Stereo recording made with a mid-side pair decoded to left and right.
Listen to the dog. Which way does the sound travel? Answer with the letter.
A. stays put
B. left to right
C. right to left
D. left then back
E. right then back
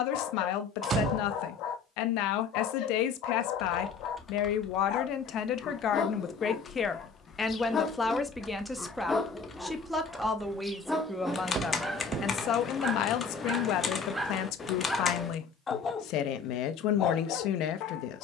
E.